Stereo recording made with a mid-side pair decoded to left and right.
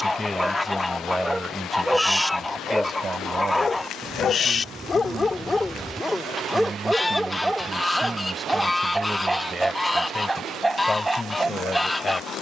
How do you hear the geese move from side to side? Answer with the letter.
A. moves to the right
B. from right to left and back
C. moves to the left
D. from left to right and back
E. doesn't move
E.